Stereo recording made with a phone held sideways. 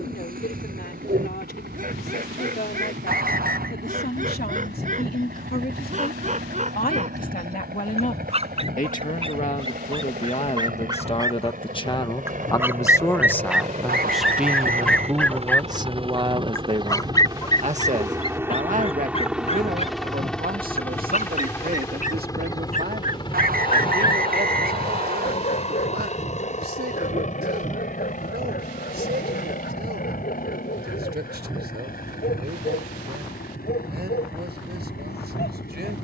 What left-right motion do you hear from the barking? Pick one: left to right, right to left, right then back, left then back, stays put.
right to left.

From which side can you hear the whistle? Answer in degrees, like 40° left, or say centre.
60° right.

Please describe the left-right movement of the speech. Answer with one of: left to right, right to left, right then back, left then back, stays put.
left to right.